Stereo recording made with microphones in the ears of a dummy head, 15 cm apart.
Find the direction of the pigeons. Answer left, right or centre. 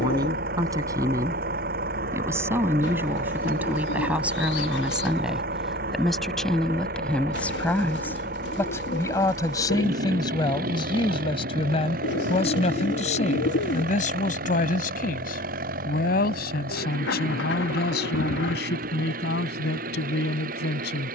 left.